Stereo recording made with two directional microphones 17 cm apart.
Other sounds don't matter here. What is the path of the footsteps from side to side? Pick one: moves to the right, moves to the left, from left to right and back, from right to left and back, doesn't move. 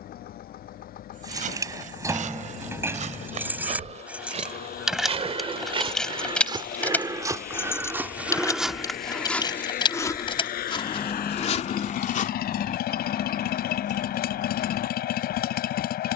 moves to the left.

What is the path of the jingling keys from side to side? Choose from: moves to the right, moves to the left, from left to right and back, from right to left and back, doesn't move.
moves to the left.